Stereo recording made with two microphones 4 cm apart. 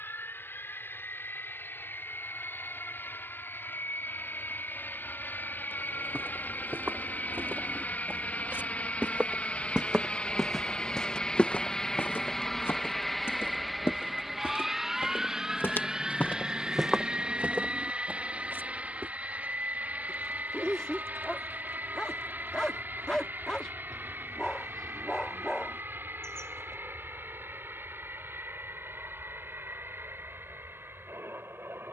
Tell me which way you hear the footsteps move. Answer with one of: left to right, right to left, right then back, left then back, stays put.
left then back.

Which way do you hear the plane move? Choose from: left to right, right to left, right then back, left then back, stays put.
left to right.